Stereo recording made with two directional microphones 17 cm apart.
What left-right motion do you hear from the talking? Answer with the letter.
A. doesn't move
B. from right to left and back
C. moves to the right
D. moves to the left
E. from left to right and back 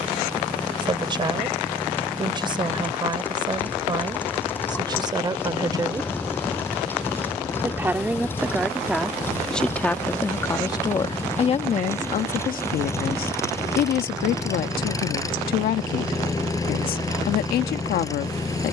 D.